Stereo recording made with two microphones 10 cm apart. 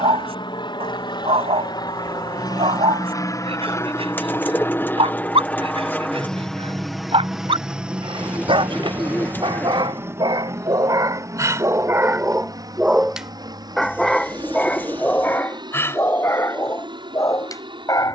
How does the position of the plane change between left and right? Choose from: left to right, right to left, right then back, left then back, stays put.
left to right.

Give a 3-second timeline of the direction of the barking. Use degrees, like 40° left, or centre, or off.
70° right, 70° right, 70° right, 40° right, centre, 30° left.